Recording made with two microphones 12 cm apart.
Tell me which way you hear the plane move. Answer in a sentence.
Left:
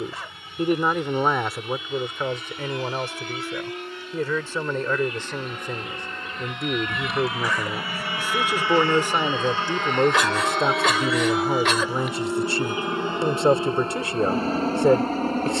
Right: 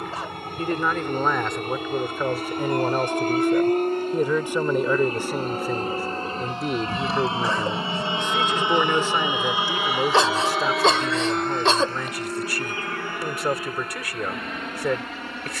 In this clip you hear the plane travel towards the left.